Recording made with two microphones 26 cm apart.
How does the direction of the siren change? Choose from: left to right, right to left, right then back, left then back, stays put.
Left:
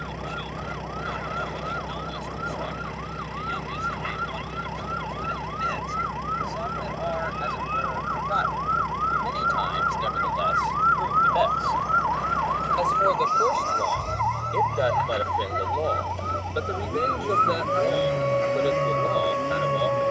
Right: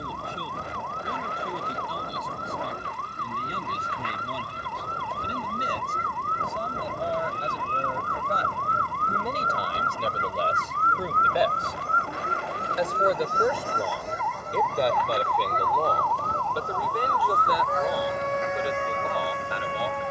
right to left.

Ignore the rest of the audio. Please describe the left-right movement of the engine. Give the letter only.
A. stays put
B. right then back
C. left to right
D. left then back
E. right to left
A.